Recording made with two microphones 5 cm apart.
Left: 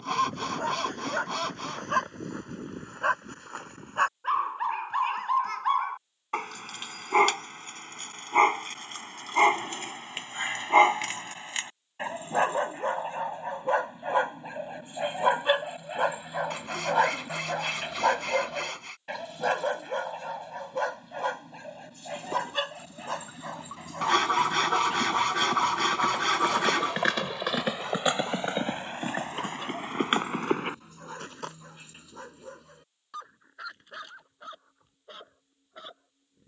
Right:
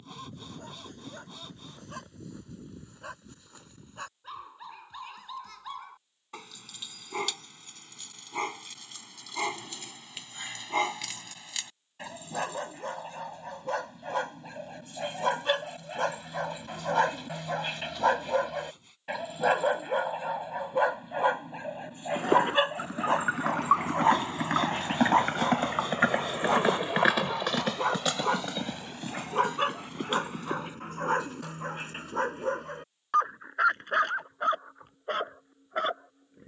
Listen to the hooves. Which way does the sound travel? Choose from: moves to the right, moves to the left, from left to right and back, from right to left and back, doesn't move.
moves to the left.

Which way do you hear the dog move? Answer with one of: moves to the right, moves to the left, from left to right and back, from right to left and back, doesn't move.
moves to the right.